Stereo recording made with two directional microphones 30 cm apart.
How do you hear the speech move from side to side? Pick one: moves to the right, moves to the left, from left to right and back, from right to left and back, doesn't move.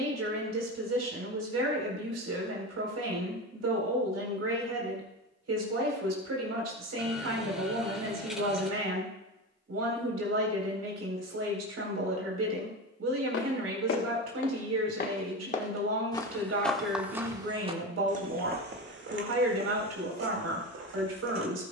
doesn't move.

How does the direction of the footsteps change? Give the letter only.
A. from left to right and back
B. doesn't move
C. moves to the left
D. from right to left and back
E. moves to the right
E.